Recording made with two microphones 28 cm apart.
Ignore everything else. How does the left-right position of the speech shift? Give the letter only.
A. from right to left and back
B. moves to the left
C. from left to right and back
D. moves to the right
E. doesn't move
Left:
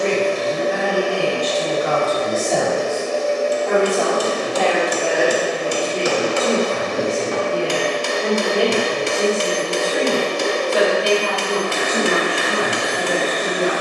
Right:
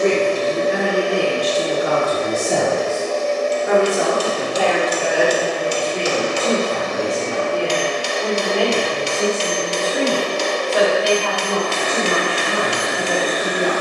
B.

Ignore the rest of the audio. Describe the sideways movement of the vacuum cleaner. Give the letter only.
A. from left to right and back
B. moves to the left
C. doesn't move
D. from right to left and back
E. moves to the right
D.